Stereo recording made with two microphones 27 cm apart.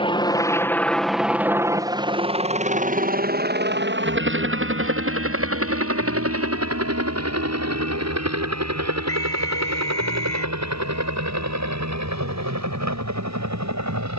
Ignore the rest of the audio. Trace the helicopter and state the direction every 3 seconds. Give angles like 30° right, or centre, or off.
10° right, 50° right, 60° right, 70° right, 70° right.